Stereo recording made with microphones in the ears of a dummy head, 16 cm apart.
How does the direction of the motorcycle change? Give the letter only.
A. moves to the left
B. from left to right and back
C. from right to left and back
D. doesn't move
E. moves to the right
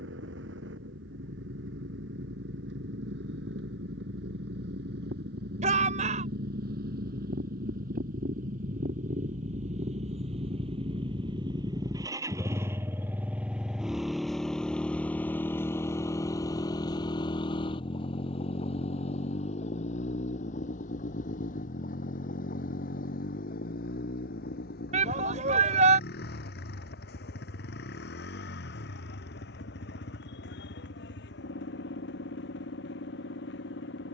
A.